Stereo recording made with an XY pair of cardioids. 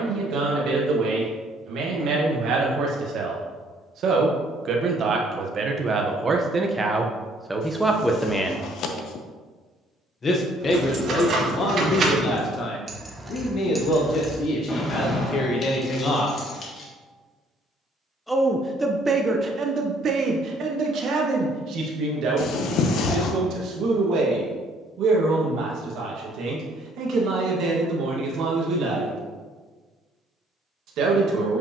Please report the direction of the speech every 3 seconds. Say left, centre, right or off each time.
right, right, centre, left, left, left, right, right, right, right, right.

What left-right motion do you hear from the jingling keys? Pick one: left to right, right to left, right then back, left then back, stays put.
right to left.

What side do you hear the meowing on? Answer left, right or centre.
left.